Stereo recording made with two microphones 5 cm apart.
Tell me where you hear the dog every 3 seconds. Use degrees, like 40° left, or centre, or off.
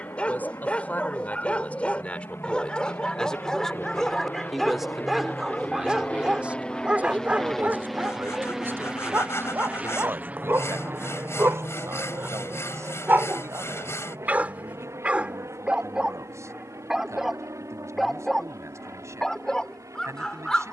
20° left, centre, 20° right, 40° right, 40° right, 10° right, 10° left.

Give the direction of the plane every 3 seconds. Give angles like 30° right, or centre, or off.
60° left, 40° left, 10° left, 30° right, 50° right, 60° right, 70° right.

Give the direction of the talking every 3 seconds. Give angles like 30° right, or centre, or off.
30° left, centre, 40° right, 60° right, 70° right, 70° right, 70° right.